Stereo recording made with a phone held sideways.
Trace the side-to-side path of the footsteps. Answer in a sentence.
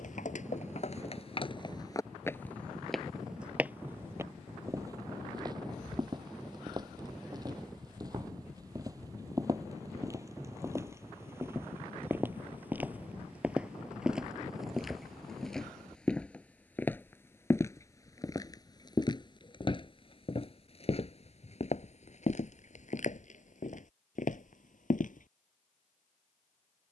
In this clip you hear the footsteps go right and come back.